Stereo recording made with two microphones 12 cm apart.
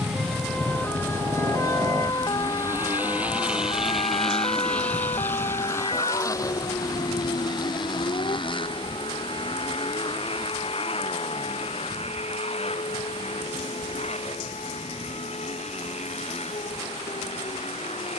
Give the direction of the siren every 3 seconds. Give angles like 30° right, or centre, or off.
20° left, 50° left, 50° left, 60° left, 60° left, 60° left.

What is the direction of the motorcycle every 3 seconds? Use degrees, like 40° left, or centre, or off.
30° right, 10° left, 40° left, 50° left, 60° left, 70° left.